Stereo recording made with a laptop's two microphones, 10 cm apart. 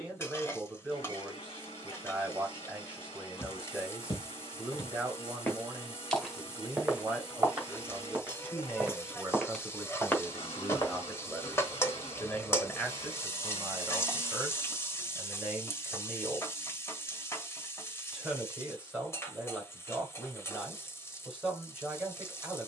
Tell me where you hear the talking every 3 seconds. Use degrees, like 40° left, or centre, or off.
20° right, 20° right, 10° right, centre, centre, 10° right, 10° right, 10° right.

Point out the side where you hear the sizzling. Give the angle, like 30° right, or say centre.
30° left.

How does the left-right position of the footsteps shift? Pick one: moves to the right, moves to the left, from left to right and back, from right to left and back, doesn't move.
from left to right and back.